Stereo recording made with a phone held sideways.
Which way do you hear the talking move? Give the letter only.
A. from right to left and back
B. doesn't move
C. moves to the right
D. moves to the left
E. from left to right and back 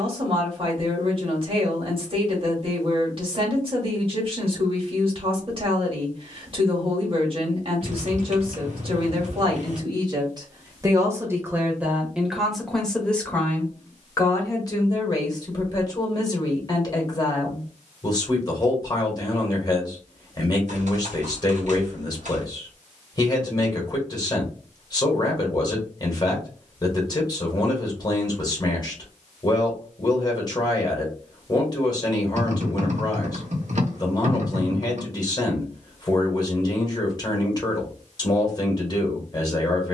D.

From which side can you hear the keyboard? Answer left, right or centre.
right.